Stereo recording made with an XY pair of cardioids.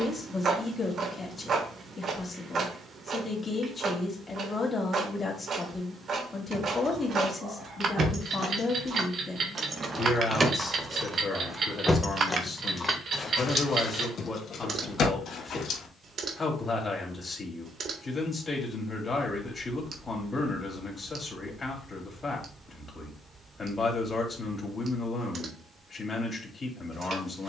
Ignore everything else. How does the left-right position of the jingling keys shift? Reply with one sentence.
You can hear the jingling keys go from the right side to the left.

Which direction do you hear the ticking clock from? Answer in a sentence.
In this clip you hear the ticking clock on the right.